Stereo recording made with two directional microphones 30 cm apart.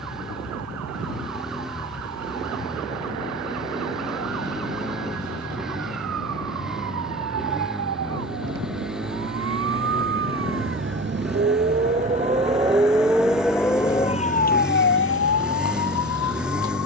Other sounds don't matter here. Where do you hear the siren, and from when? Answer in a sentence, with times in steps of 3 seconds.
You can hear the siren on the right from 0 s, in the centre from 12 s and on the left from 15 s.